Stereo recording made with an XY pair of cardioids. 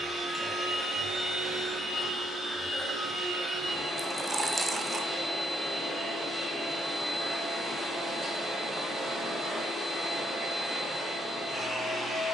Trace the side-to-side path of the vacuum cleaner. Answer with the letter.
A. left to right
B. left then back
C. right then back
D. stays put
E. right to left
D.